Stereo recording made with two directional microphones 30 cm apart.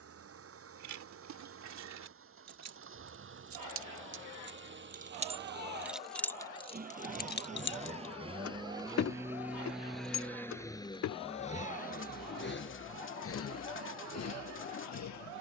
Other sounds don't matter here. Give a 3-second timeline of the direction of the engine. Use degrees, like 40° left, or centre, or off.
50° right, 40° right, 20° right, 10° left, 50° left.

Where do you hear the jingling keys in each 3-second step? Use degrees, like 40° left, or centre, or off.
60° right, 30° right, 30° left, 60° left, off.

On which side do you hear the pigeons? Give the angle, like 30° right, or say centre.
40° left.